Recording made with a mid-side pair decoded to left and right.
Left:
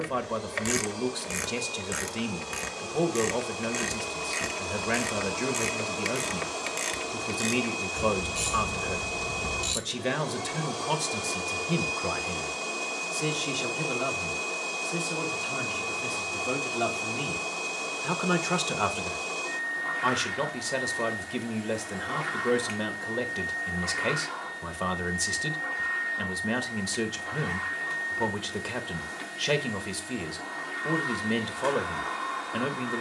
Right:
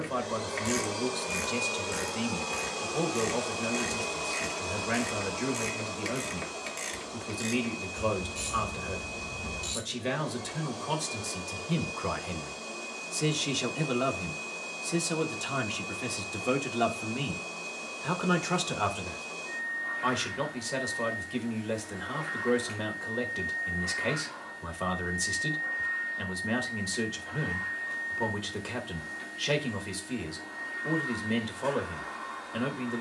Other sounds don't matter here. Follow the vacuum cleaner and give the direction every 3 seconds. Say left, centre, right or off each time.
right, centre, left, left, left, left, left, left, left, left, left.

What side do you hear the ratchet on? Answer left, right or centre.
left.